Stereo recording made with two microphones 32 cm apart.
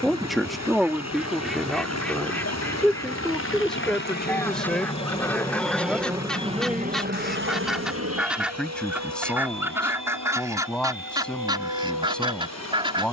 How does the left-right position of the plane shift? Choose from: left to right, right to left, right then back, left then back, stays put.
left to right.